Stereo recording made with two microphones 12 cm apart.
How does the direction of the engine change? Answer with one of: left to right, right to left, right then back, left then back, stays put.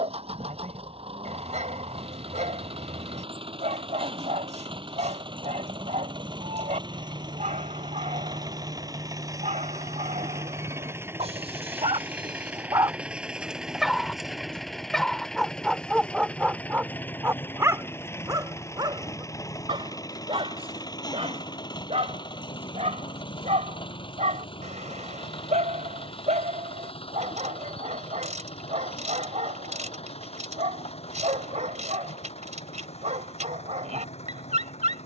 right to left.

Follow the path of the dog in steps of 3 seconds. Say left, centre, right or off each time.
right, right, right, right, right, centre, right, right, right, right, right, right.